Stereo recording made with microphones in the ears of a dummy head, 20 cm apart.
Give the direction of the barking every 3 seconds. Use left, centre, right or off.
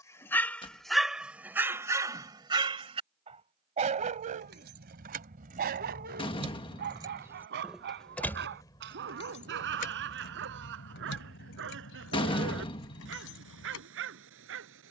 centre, right, right, right, right.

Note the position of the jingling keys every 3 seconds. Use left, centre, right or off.
off, right, centre, left, left.